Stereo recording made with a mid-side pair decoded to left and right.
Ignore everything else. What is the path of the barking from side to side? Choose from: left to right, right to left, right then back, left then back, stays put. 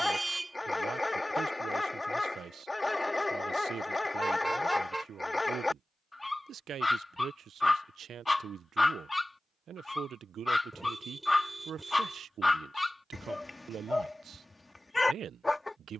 stays put.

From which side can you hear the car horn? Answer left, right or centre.
centre.